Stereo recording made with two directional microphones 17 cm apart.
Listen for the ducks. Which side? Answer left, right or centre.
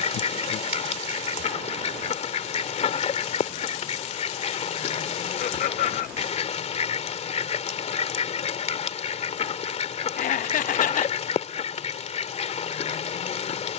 left.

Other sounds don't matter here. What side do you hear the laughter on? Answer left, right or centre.
left.